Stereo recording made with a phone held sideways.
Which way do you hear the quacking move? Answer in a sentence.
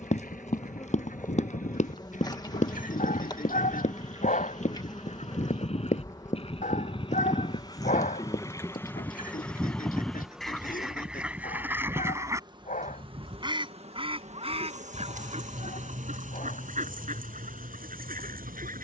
In this clip you hear the quacking go from the left side to the right.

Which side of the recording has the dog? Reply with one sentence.
You can hear the dog on the left.